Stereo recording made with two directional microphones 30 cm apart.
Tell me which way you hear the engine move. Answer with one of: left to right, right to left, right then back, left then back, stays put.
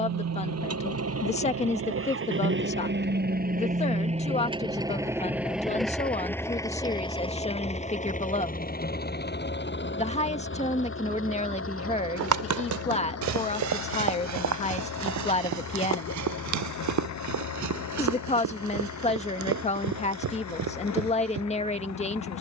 right to left.